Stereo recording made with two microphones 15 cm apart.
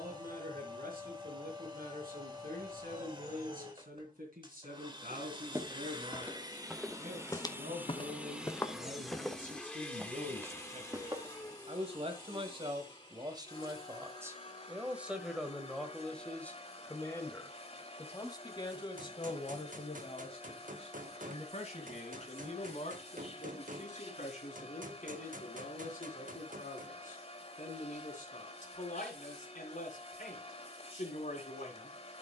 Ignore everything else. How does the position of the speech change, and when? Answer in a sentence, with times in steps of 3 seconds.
In this clip you hear the speech on the right from 0 s, in the centre from 15 s and on the left from 18 s.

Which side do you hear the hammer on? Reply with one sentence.
You can hear the hammer on the right.